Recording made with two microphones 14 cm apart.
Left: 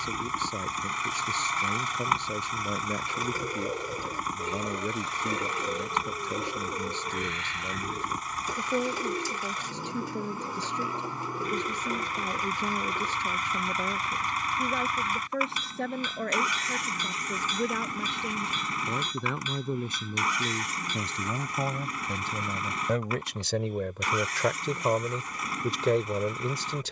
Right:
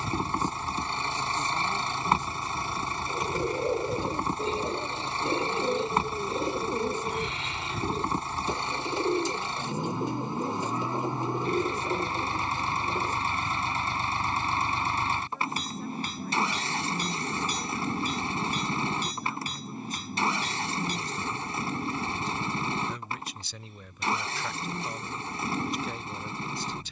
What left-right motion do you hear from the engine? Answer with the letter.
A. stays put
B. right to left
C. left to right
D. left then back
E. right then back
A.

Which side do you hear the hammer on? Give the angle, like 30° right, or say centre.
30° right.